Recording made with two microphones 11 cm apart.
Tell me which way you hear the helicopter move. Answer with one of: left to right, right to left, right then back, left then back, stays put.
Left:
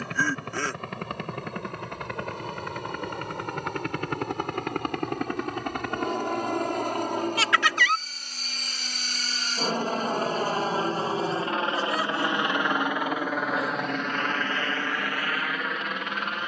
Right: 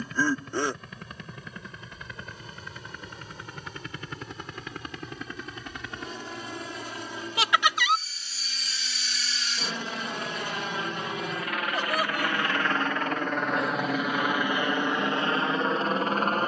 left to right.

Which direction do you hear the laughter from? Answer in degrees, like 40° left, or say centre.
20° right.